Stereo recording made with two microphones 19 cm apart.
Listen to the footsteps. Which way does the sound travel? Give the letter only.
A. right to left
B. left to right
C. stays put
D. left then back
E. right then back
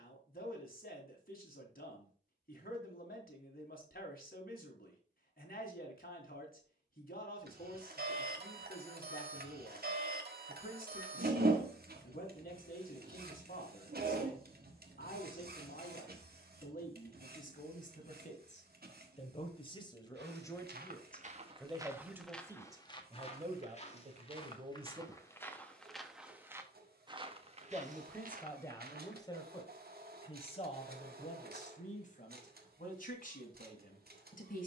D.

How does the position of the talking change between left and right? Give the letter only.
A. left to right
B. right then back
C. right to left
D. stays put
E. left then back
B.